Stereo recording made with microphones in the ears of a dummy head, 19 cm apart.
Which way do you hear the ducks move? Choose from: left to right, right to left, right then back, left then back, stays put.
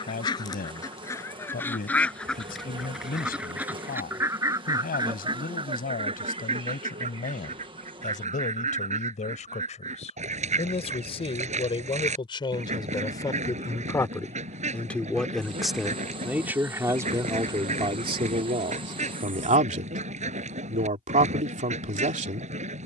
left to right.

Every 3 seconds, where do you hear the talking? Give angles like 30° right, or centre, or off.
40° left, 40° left, 40° left, 30° left, 10° left, 10° right, 30° right, 30° right.